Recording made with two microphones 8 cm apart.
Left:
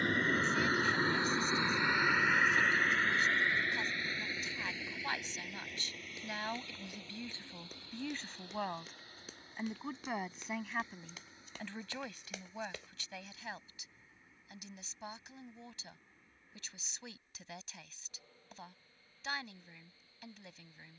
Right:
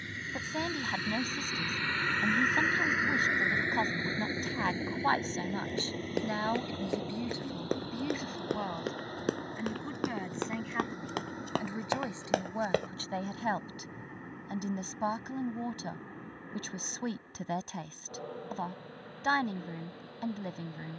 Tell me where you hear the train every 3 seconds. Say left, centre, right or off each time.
left, right, right, right, right, right, right.